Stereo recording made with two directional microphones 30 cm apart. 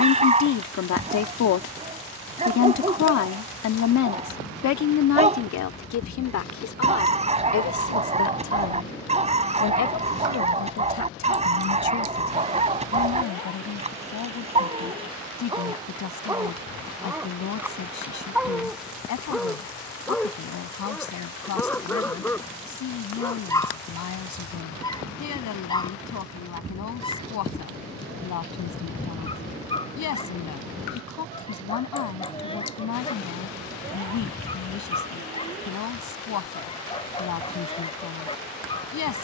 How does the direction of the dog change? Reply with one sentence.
In this clip you hear the dog move to the left.